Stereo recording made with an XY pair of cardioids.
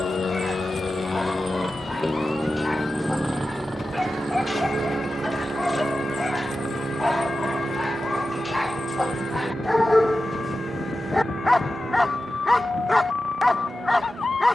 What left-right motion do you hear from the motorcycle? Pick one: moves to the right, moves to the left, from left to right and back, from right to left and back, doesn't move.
moves to the right.